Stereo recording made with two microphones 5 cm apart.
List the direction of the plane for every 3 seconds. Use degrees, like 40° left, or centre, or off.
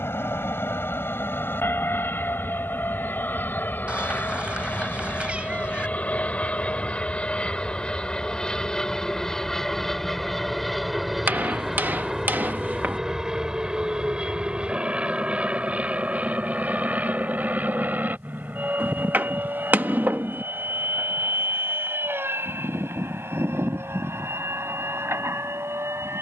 50° left, 40° left, 20° left, centre, 10° right, 30° right, 40° right, 40° right, 50° right.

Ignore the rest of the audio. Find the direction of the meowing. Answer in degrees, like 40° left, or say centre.
30° right.